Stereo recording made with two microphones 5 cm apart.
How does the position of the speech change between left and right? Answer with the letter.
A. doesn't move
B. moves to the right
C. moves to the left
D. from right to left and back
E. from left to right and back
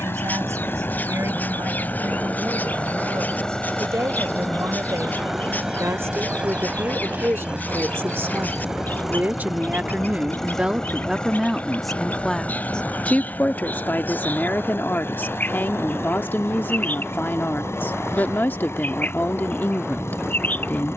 C.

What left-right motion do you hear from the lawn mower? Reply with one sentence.
In this clip you hear the lawn mower go right and come back.